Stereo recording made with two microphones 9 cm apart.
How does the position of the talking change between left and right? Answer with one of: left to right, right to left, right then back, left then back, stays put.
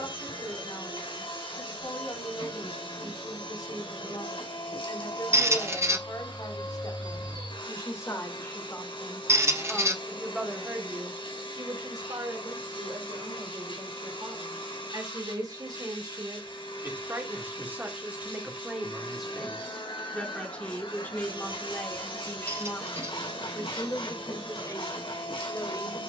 right then back.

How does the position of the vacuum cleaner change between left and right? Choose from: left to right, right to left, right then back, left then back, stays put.
stays put.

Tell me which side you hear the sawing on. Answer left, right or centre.
left.